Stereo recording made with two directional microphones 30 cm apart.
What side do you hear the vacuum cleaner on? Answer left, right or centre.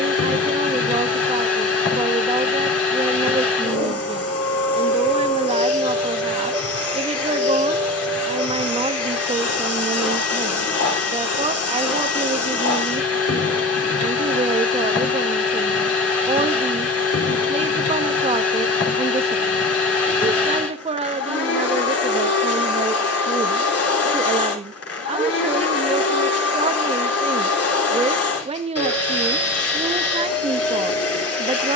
left.